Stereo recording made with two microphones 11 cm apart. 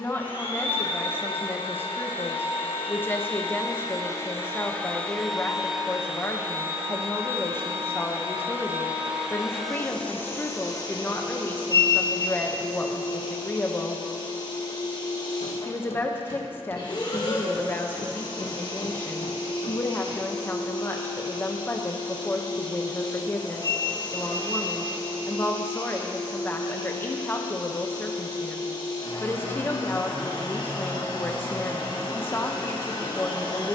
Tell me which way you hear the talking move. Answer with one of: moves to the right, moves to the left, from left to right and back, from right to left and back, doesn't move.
doesn't move.